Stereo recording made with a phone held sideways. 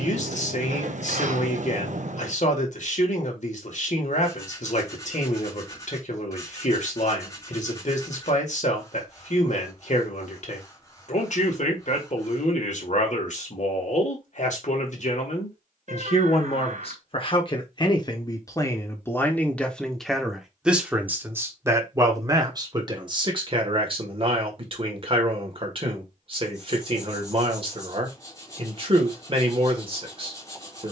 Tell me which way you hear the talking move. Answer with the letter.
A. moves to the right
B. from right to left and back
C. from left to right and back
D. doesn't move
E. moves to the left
A.